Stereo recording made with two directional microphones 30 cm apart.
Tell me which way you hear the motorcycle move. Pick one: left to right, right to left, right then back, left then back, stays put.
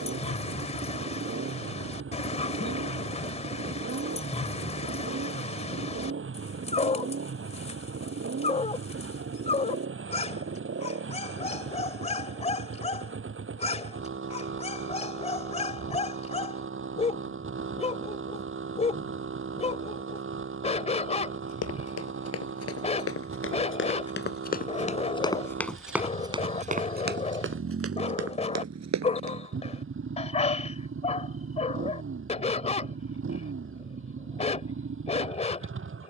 stays put.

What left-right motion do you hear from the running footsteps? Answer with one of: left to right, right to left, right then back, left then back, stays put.
left to right.